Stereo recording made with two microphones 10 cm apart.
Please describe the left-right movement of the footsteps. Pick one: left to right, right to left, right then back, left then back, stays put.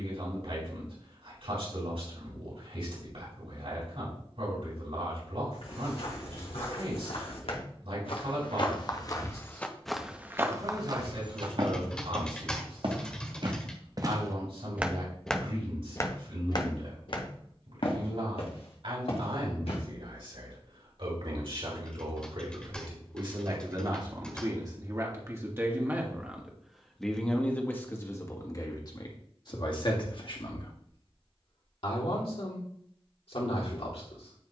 right then back.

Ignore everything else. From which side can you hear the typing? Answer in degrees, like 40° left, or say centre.
10° left.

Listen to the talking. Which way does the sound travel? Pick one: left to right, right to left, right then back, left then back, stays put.
right to left.